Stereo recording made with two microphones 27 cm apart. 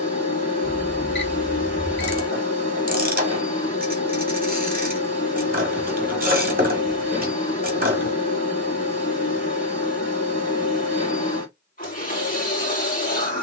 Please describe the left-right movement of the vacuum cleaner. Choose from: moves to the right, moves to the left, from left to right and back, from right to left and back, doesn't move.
doesn't move.